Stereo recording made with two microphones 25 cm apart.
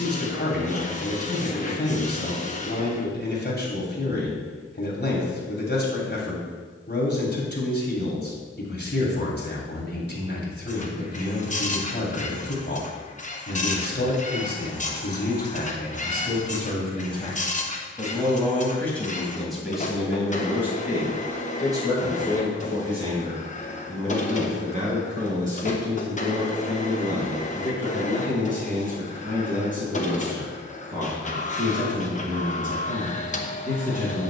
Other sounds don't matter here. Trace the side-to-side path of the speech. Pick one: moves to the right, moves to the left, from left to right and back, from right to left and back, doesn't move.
moves to the right.